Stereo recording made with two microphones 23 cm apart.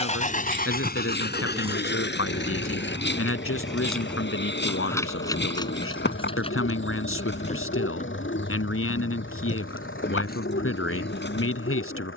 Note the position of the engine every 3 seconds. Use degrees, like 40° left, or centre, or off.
50° left, 60° left, 60° left, 60° left.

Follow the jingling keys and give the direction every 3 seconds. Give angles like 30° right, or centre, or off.
20° right, 10° left, 30° left, 40° left.